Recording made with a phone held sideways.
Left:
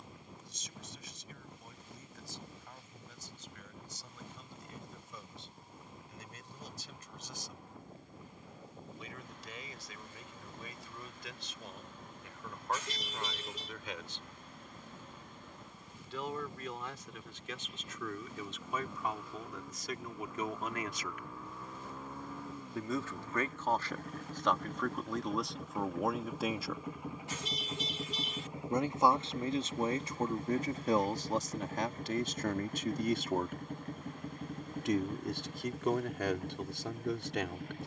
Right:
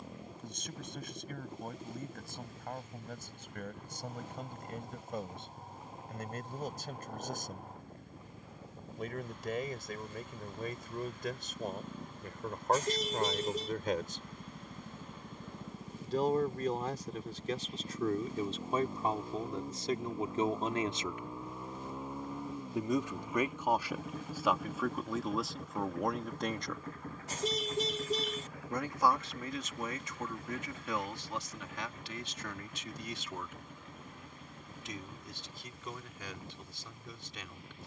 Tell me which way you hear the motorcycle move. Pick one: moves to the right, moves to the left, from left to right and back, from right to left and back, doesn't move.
moves to the left.